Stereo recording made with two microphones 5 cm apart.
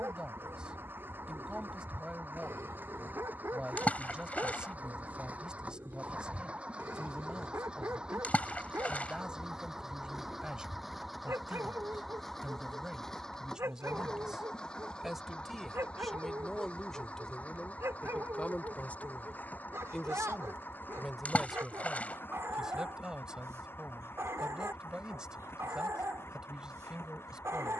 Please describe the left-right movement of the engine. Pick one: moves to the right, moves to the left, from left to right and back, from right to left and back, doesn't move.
moves to the left.